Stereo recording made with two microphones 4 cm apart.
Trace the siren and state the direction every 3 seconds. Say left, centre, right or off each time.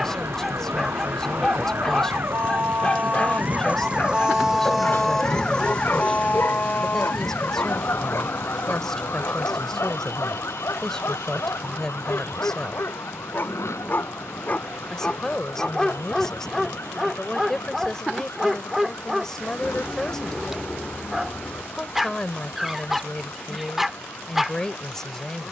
right, centre, left, left, left, left, left, left, left.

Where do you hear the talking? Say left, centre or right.
centre.